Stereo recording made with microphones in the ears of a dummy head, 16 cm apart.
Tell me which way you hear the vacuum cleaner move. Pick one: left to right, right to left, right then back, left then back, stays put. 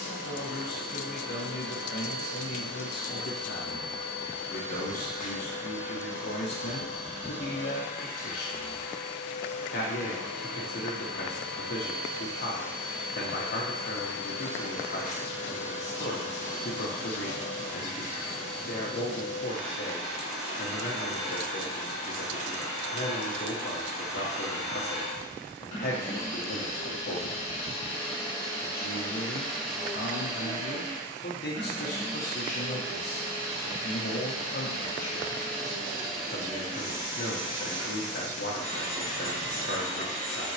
left to right.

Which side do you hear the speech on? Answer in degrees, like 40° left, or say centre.
60° left.